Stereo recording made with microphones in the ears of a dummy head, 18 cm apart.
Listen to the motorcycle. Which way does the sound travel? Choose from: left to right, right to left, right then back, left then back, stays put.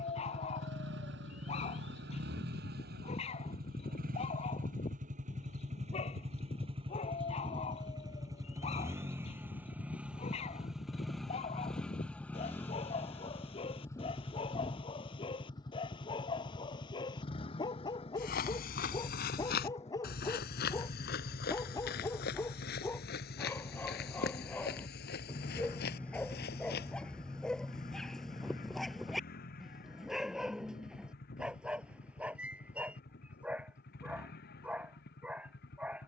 right to left.